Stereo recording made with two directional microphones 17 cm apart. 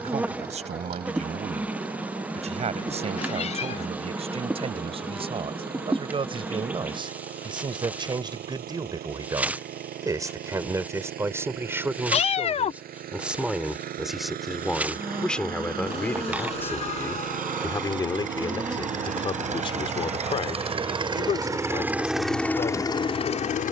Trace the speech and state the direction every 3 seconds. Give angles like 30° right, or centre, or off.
40° right, 30° right, 30° right, 20° right, centre, 10° left, 30° left, 40° left.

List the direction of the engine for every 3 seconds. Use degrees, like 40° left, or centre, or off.
70° right, 60° right, 60° right, 60° right, 60° right, 60° right, 40° right, 10° left.